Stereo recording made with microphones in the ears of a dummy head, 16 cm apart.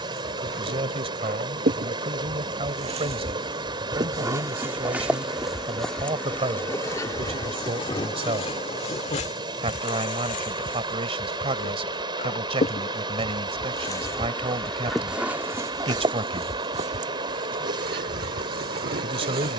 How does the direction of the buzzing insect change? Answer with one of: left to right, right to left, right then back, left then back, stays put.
left then back.